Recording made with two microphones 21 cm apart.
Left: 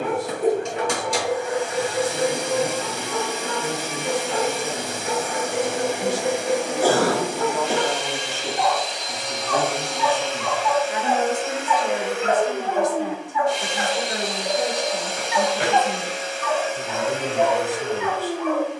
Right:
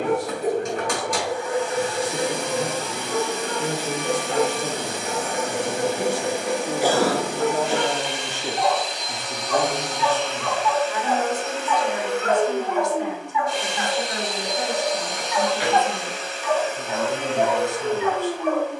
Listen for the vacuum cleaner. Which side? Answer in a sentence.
In this clip you hear the vacuum cleaner on the left.